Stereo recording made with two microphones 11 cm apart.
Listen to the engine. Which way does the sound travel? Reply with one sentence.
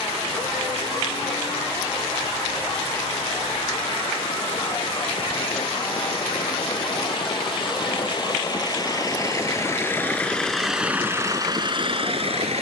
You can hear the engine go from the left side to the right.